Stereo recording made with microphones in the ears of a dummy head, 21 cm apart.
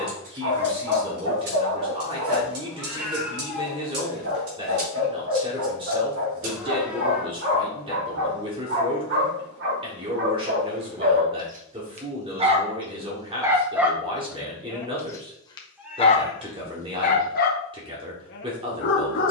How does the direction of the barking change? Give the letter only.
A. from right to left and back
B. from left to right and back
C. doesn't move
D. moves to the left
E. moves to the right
D.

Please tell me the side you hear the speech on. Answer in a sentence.
You can hear the speech on the right.